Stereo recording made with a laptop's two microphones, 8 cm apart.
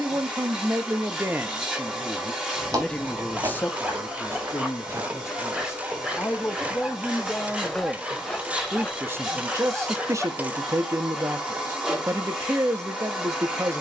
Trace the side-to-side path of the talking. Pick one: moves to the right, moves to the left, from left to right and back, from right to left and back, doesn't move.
from right to left and back.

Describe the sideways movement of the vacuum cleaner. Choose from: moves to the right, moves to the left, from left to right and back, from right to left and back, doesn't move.
doesn't move.